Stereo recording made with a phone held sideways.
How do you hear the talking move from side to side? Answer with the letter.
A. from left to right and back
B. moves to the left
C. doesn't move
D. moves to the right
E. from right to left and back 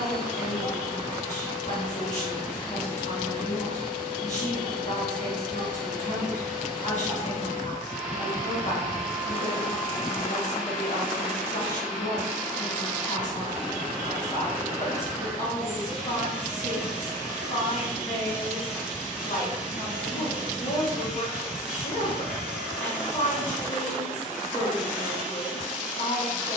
C.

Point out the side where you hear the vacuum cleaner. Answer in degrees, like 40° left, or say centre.
centre.